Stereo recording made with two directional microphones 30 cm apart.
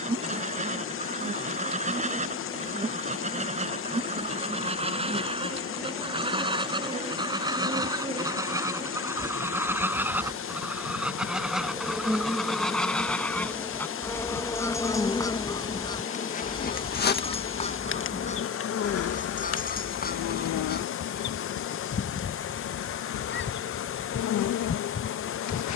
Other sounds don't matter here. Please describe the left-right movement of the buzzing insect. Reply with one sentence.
You can hear the buzzing insect go from the right side to the left.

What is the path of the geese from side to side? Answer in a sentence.
You can hear the geese move to the left.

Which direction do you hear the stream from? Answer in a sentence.
You can hear the stream on the left.